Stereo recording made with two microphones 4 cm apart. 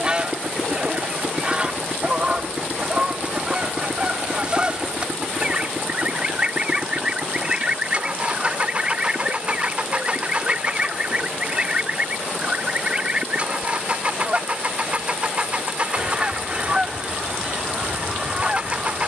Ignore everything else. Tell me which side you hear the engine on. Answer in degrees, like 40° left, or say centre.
30° right.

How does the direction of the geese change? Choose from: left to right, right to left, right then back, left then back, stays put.
stays put.